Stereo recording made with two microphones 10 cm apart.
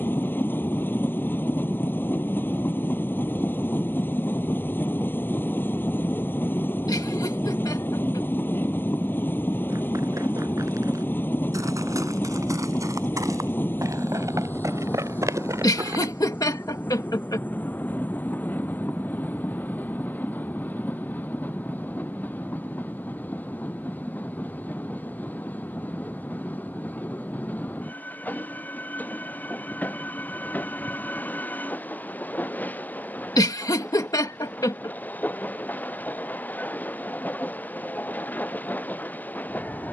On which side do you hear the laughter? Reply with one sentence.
In this clip you hear the laughter on the left.